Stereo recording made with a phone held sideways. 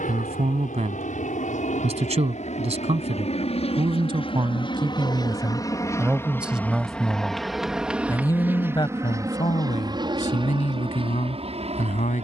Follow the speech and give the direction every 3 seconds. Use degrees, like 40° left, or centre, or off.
40° right, 30° right, 10° left, 50° left.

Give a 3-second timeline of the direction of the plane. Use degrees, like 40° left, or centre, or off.
60° left, 30° left, centre, 30° right.